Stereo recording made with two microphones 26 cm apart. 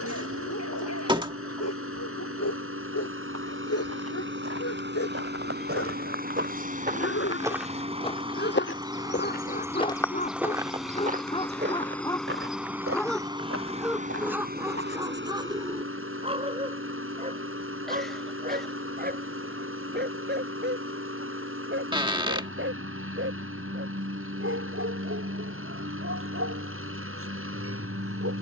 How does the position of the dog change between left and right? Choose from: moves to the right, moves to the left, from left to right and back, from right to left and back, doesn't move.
moves to the right.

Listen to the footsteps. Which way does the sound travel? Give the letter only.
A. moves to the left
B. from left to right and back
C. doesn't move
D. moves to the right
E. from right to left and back
E.